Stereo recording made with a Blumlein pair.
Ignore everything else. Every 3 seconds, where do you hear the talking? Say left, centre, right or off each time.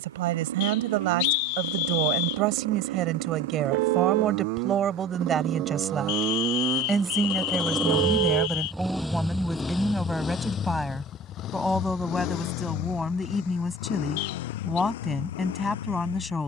right, right, centre, centre, centre, centre.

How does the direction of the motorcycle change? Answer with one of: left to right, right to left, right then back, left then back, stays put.
right to left.